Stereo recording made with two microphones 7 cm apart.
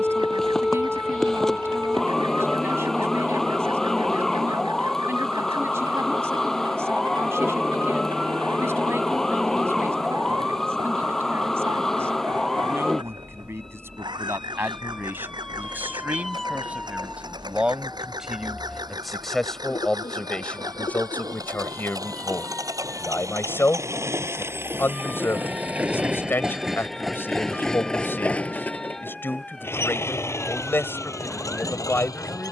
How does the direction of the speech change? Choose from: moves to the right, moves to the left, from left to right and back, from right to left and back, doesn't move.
moves to the left.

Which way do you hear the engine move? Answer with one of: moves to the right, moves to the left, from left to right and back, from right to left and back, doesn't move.
moves to the left.